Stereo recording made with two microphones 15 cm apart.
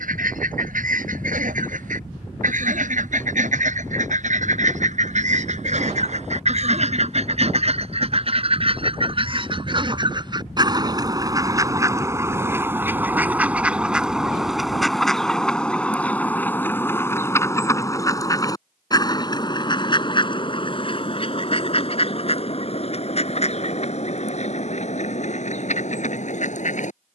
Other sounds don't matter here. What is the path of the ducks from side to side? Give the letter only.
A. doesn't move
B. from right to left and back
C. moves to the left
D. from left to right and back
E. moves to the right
C.